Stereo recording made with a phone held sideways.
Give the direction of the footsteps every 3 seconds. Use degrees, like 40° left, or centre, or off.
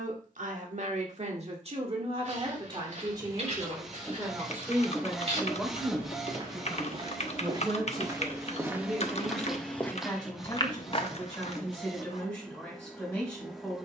50° right, 50° right, 30° right, 20° left, off.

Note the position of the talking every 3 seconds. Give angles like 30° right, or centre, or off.
50° right, 20° right, centre, 10° left, 10° left.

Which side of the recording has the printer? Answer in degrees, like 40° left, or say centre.
centre.